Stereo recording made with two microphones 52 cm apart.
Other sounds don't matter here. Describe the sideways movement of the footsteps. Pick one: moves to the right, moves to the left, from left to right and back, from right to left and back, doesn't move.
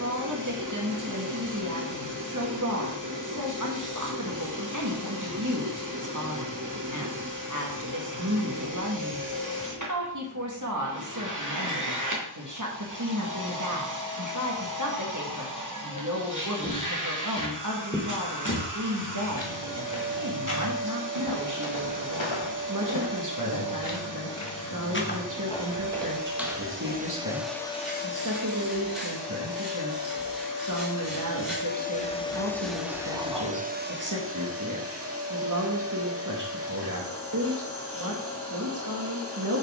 from right to left and back.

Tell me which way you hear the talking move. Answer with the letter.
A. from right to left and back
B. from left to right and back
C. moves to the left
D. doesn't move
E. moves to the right
D.